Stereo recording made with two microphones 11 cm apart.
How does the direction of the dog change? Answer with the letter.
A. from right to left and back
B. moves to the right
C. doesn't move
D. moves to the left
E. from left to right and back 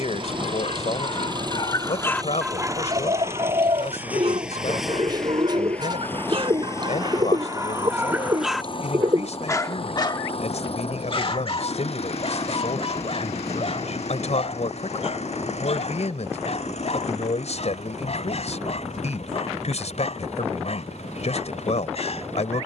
E.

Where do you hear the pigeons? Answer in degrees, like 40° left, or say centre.
40° right.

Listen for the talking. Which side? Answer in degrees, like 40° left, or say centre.
80° left.